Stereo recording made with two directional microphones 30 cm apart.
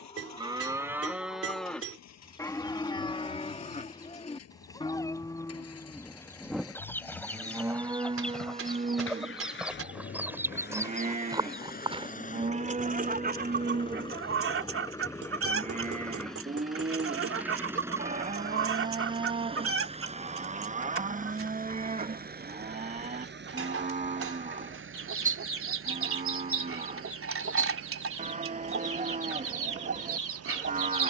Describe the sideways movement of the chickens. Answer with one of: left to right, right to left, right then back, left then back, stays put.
left to right.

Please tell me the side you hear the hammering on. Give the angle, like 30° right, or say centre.
50° right.